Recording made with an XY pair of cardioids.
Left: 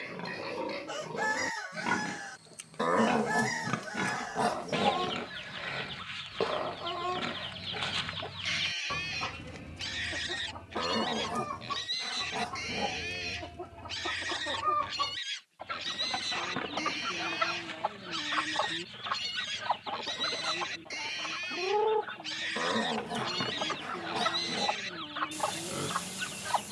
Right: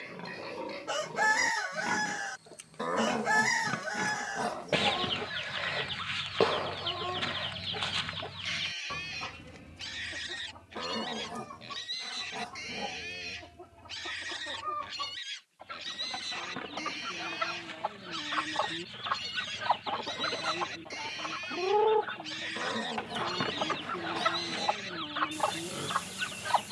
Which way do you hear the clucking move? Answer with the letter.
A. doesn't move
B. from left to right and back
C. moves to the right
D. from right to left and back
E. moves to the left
D.